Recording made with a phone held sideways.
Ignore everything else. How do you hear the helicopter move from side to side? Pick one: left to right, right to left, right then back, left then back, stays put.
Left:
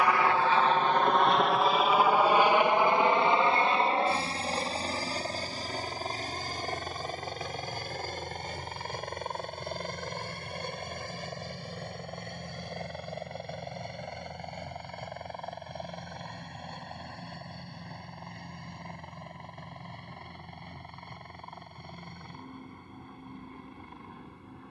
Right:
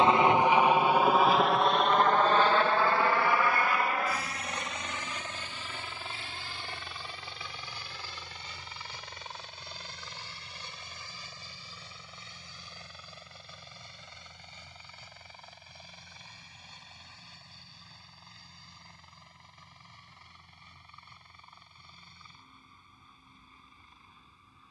right to left.